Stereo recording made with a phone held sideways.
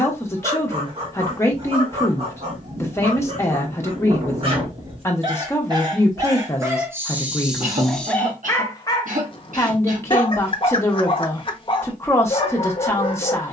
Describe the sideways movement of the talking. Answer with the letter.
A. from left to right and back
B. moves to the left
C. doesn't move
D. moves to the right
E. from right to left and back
C.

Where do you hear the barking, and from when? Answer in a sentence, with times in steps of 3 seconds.
You can hear the barking on the right from 0 s, in the centre from 6 s and on the left from 9 s.